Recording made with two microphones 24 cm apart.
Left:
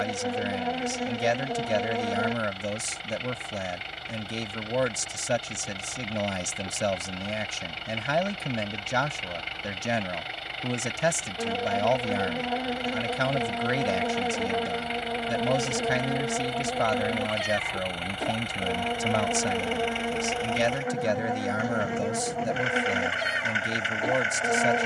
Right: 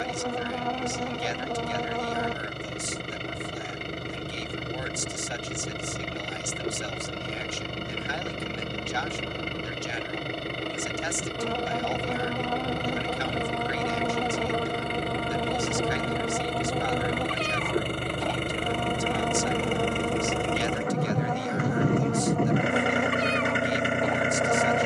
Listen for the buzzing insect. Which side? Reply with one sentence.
In this clip you hear the buzzing insect in the centre.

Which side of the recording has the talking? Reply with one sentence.
You can hear the talking on the left.